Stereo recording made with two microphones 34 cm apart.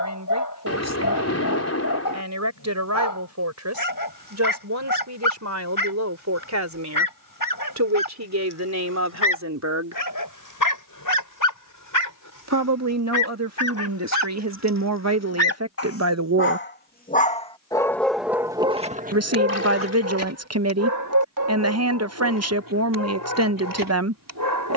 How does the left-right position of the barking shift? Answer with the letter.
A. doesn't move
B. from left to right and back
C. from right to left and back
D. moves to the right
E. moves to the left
D.